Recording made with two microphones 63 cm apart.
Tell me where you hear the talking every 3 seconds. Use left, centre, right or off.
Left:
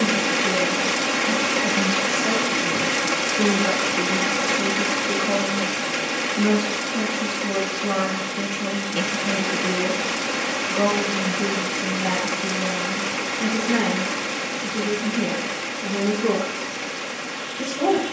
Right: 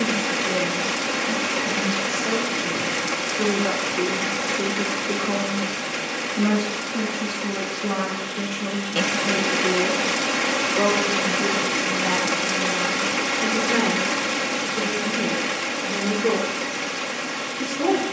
left, left, centre, left, left, left.